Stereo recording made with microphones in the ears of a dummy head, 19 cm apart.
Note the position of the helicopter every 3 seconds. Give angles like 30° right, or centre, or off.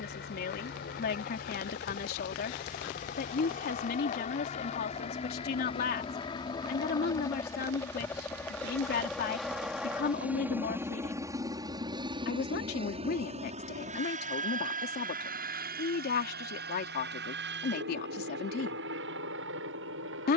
40° left, 30° left, 10° left, 10° right, 30° right, 50° right, 60° right.